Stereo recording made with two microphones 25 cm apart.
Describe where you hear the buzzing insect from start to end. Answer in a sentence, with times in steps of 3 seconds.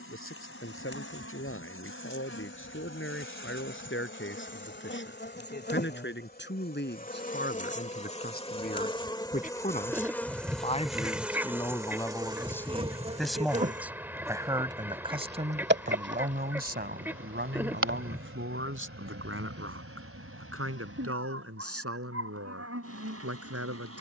In this clip you hear the buzzing insect on the left from 0 s, in the centre from 9 s and on the right from 12 s.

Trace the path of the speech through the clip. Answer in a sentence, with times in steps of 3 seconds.
In this clip you hear the speech on the left from 0 s, in the centre from 12 s and on the right from 15 s.